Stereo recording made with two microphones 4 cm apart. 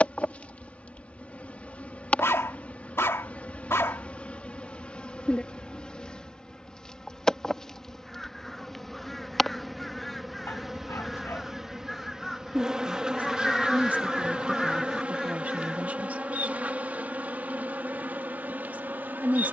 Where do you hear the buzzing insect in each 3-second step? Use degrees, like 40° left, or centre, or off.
30° left, 30° left, 10° left, centre, 20° right, 40° right, 50° right.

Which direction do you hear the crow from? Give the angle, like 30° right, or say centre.
centre.